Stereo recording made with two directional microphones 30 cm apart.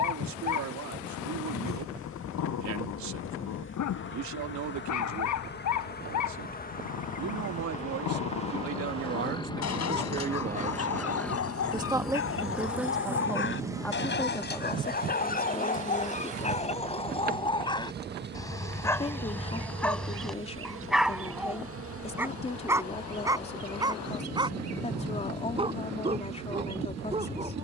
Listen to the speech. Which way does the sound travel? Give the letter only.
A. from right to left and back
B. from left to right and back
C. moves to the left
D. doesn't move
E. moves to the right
C.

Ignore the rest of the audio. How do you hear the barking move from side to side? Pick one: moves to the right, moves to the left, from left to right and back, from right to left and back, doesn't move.
moves to the right.